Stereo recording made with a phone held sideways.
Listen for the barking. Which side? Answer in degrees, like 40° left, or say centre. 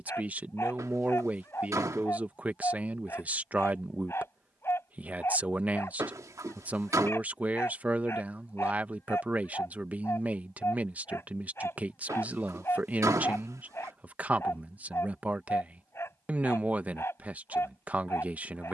20° left.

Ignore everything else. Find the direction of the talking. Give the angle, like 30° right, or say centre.
10° right.